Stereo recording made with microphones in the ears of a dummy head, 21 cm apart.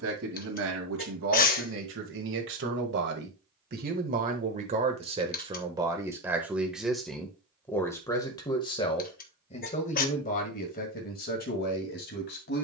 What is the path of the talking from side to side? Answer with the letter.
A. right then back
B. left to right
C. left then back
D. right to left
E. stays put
D.